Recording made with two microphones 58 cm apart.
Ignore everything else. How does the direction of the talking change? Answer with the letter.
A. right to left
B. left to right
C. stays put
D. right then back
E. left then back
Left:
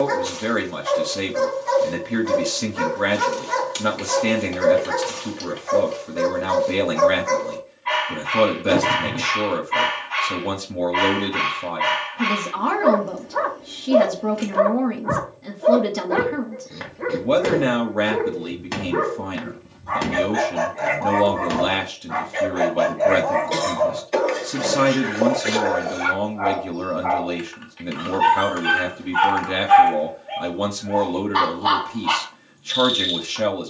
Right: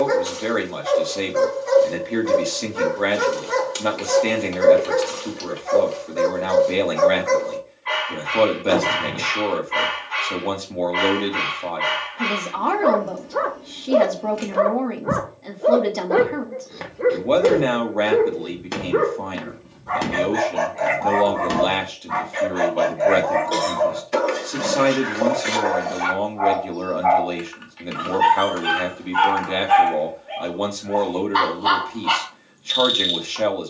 C.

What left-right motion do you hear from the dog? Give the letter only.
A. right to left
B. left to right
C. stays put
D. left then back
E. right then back
E.